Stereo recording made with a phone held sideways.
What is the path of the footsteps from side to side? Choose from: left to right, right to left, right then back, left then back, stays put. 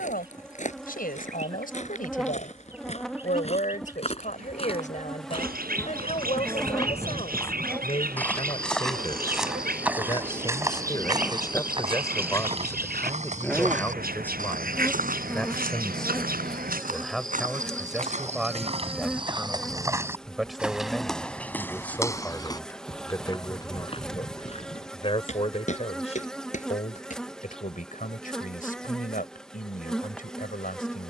right then back.